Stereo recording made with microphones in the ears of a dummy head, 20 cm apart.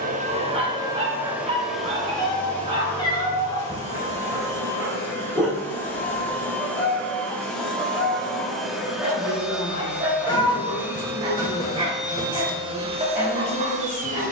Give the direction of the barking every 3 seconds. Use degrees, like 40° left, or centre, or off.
30° right, 10° right, centre, 20° right, 30° right.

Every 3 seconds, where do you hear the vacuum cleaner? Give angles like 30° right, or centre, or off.
10° right, 10° left, centre, 10° right, 30° right.